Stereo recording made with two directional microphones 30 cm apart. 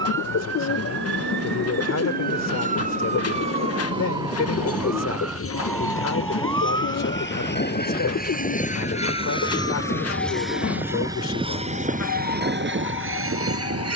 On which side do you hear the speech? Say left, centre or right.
left.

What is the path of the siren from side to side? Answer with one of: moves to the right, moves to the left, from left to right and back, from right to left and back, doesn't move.
moves to the left.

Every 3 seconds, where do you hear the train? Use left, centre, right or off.
left, left, left, centre, right.